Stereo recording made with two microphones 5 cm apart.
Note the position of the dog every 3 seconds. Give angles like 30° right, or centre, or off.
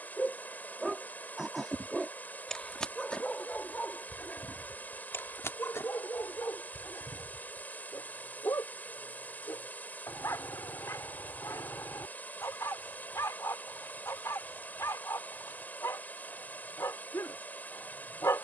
10° left, 40° left, 60° left, 70° left, 70° left, 70° left.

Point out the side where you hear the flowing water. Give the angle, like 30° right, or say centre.
30° left.